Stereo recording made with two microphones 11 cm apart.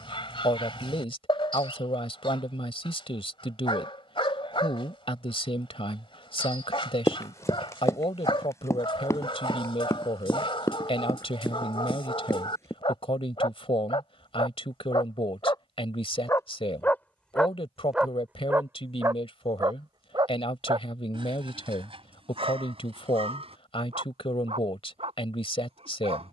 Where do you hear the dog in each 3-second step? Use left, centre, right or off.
left, left, left, left, left, left, right, right, right.